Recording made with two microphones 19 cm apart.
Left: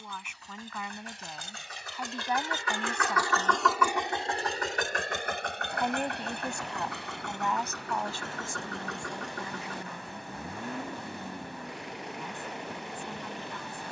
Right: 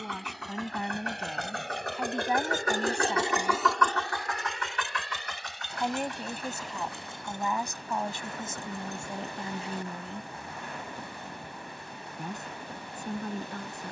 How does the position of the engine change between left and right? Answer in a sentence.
In this clip you hear the engine move from right to left.